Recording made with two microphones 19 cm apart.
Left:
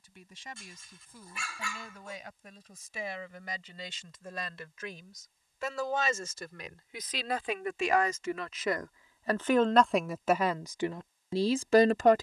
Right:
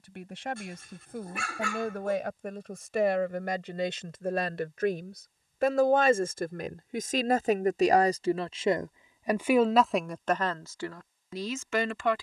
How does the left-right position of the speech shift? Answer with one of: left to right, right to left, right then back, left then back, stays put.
right to left.